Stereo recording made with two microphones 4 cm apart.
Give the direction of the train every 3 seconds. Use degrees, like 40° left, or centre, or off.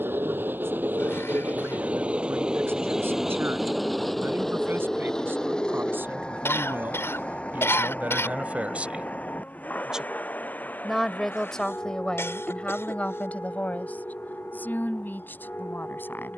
30° right, 10° left, 30° left, 40° left, 50° left, 50° left.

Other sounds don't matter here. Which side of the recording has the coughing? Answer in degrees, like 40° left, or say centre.
80° left.